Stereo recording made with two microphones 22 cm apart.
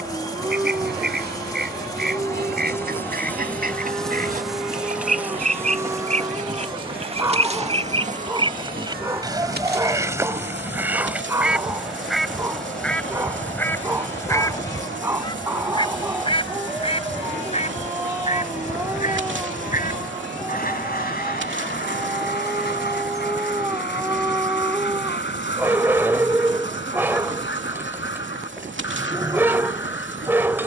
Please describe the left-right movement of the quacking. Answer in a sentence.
In this clip you hear the quacking travel towards the left.